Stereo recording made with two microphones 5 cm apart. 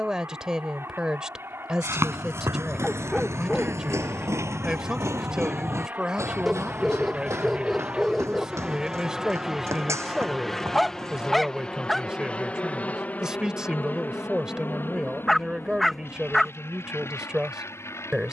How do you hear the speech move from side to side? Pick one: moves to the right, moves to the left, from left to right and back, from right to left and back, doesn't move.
doesn't move.